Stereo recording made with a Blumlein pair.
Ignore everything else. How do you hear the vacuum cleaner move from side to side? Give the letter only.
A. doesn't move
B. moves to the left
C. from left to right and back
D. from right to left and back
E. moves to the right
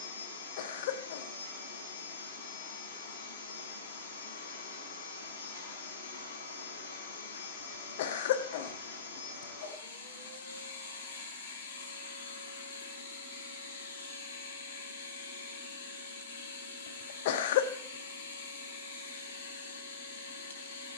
A.